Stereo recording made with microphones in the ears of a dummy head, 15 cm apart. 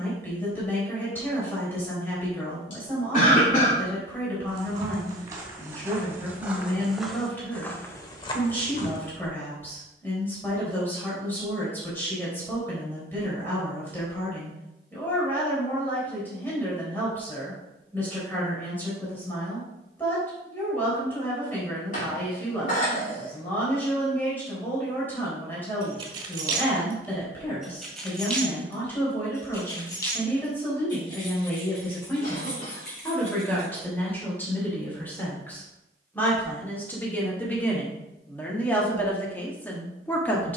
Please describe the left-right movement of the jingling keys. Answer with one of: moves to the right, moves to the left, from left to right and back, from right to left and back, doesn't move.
moves to the left.